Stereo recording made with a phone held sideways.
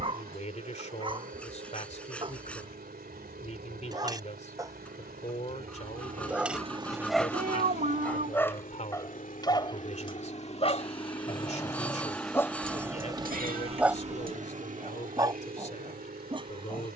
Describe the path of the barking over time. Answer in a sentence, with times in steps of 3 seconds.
You can hear the barking on the right from 0 s, in the centre from 6 s, on the left from 9 s, in the centre from 12 s and on the right from 15 s.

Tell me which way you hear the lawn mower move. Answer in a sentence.
You can hear the lawn mower go left and come back.